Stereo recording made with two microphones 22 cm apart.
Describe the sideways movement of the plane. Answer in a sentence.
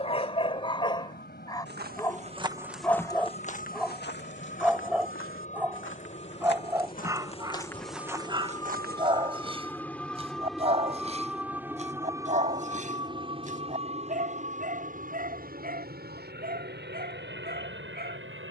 In this clip you hear the plane move to the right.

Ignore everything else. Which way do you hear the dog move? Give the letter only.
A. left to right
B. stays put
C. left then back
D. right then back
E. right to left
A.